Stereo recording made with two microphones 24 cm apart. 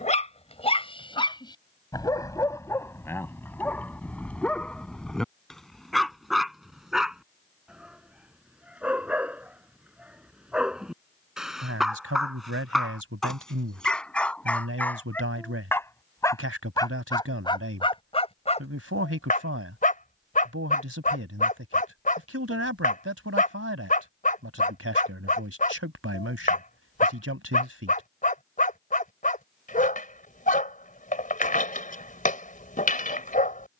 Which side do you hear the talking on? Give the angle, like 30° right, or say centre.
70° right.